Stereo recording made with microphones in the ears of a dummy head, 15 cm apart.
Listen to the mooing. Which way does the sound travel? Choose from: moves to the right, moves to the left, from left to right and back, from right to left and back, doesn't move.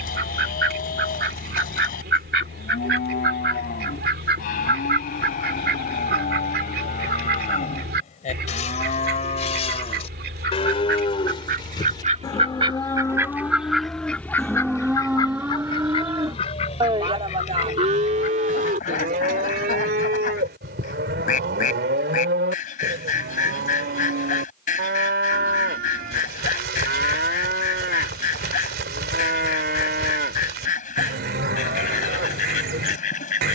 moves to the right.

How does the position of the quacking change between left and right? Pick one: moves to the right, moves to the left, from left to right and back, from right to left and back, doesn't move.
moves to the left.